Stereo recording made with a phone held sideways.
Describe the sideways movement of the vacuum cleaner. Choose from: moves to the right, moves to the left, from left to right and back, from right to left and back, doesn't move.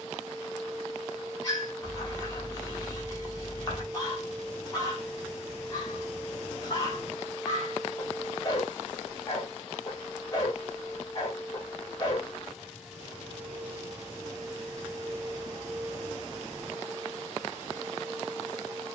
from right to left and back.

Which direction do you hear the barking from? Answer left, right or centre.
left.